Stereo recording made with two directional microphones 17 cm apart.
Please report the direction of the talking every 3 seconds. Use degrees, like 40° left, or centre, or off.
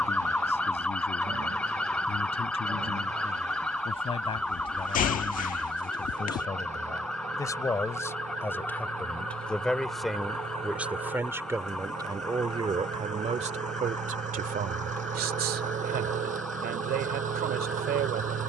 40° left, 30° left, 20° left, 10° right, 40° right, 70° right.